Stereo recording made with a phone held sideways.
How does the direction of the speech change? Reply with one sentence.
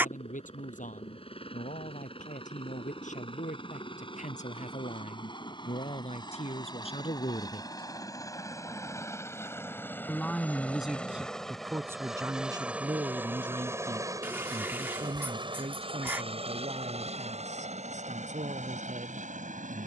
In this clip you hear the speech travel towards the right.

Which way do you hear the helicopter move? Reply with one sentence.
In this clip you hear the helicopter move from left to right.